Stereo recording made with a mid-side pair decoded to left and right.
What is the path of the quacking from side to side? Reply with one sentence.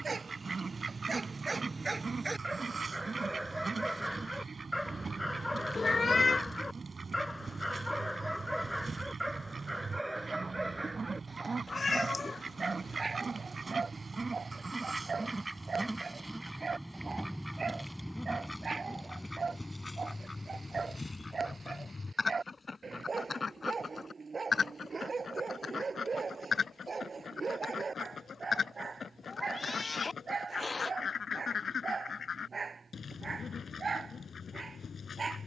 In this clip you hear the quacking go from the right side to the left.